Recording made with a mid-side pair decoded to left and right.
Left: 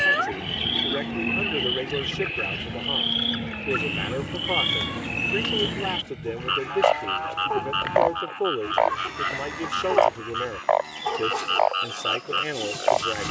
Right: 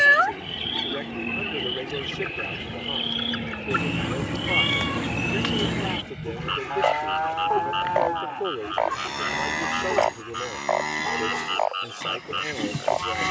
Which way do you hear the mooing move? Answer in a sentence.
You can hear the mooing go from the left side to the right.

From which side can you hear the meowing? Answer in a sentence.
In this clip you hear the meowing on the right.